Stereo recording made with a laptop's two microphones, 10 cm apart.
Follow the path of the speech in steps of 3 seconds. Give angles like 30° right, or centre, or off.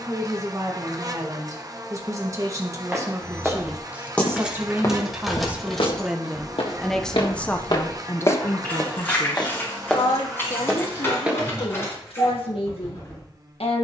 30° right, 20° right, 20° left, 60° left, 80° left.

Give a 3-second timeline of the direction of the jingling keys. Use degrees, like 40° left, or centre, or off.
off, 10° right, 20° left, 30° left, 30° left.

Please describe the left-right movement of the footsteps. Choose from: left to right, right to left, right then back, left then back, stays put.
left then back.